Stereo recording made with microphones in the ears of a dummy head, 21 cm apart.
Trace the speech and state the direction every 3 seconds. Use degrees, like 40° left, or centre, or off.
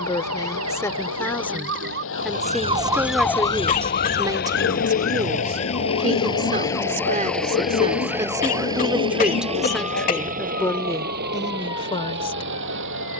10° left, 20° right, 30° right, 10° left, 20° left.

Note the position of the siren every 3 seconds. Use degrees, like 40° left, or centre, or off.
50° right, 40° left, 70° left, 80° left, 80° left.